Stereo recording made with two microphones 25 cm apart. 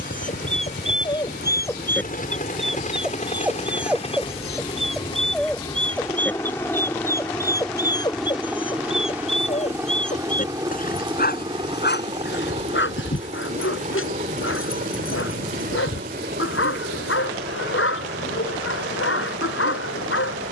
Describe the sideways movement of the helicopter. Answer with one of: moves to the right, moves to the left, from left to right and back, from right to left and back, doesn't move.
moves to the right.